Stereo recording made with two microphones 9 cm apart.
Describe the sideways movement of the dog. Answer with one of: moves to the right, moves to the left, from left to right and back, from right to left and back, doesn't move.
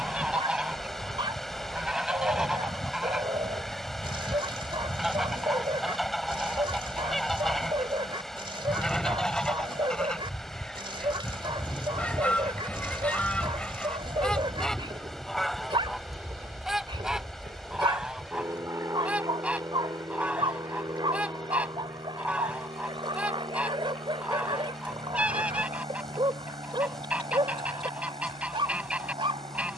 doesn't move.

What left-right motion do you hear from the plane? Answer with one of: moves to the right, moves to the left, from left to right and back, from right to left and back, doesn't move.
moves to the right.